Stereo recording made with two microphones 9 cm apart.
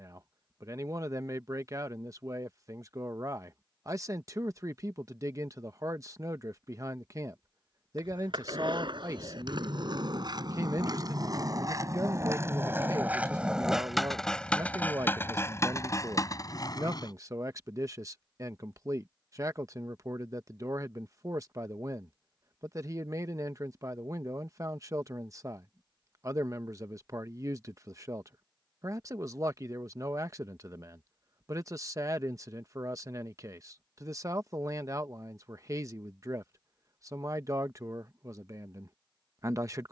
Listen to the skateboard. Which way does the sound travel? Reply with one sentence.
In this clip you hear the skateboard travel towards the left.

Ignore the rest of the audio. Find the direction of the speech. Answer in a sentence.
You can hear the speech on the right.